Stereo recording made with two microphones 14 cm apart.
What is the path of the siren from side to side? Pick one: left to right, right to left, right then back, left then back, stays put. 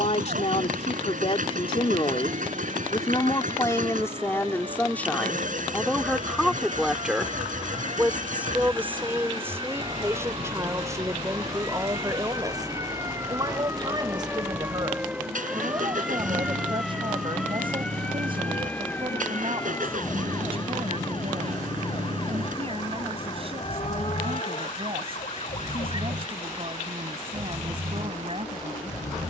right to left.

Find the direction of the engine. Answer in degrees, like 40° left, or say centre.
70° right.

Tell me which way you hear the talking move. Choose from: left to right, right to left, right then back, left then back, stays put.
left to right.